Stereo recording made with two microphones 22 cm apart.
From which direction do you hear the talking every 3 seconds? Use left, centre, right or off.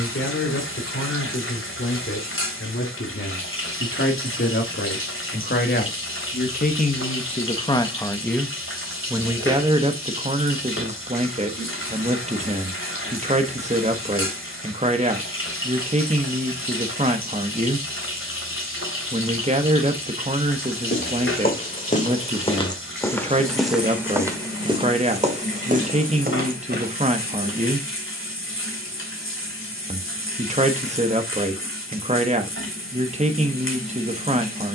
left, left, left, right, right, right, right, right, right, right, right, right.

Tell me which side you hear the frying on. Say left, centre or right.
left.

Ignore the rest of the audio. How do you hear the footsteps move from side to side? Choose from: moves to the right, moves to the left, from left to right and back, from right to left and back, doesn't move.
moves to the right.